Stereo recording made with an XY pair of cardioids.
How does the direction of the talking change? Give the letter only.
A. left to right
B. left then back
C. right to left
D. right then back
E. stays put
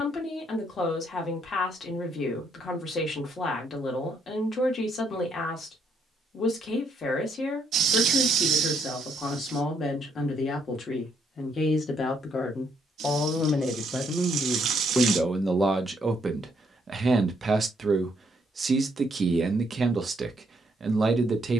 A.